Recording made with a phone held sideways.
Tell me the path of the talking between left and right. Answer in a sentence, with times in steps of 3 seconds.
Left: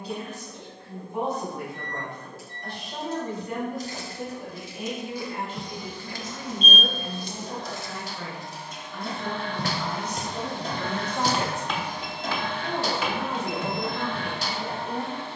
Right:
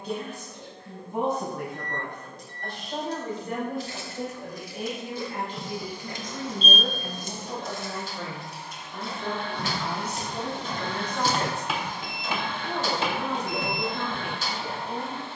You can hear the talking on the right from 0 s, in the centre from 9 s and on the left from 12 s.